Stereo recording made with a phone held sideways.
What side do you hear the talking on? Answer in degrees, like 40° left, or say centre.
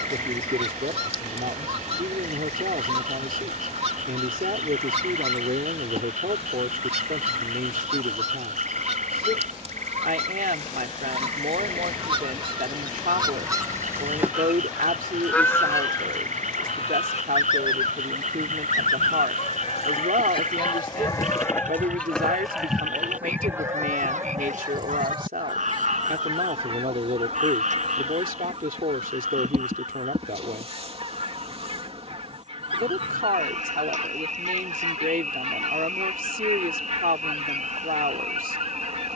80° right.